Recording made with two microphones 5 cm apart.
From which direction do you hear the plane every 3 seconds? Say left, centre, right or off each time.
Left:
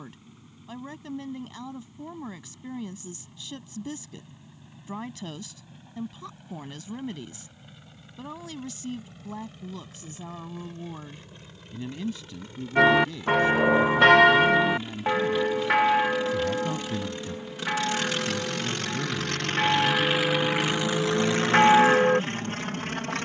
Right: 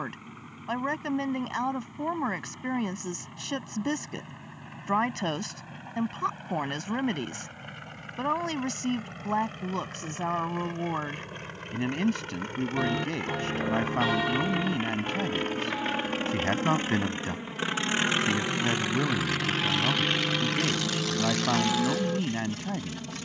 right, right, right, right, right, right, centre, left.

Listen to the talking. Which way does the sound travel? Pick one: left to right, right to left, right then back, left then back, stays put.
stays put.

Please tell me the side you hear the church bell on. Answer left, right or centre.
left.